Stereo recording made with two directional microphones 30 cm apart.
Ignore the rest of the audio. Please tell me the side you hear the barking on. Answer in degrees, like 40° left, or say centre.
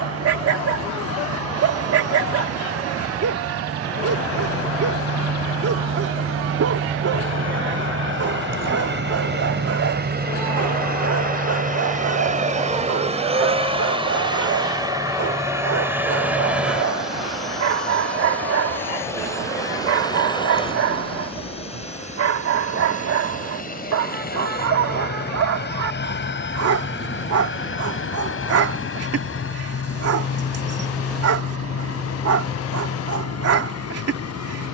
50° right.